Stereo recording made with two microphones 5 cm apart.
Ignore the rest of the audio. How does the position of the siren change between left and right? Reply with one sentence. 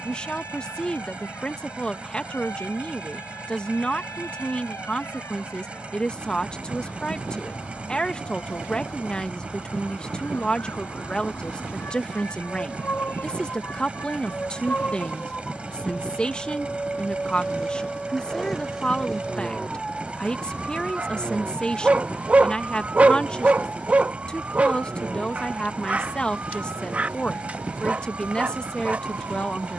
In this clip you hear the siren travel towards the right.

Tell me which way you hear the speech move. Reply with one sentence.
You can hear the speech stay put.